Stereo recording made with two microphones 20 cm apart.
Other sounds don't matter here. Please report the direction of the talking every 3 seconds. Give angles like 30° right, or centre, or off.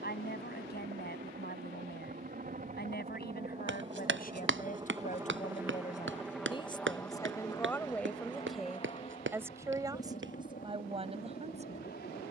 50° left, 40° left, 10° left, 20° right.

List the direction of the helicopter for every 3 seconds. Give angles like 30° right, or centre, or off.
50° right, 20° right, 10° left, 40° left.